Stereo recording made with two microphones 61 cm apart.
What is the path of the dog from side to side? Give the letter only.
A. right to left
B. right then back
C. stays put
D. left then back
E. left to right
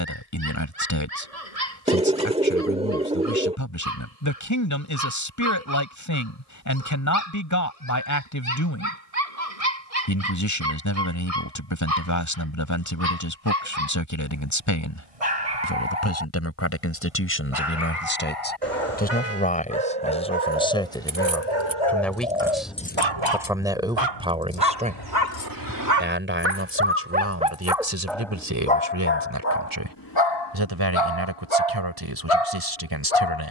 A.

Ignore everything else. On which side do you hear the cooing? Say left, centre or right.
centre.